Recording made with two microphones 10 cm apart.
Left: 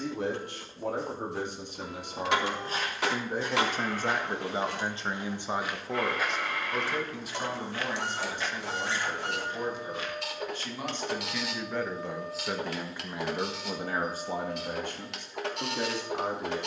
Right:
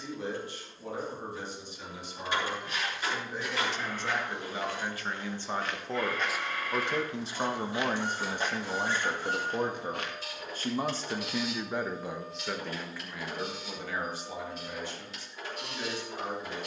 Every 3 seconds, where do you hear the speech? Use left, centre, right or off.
left, left, right, right, left, left.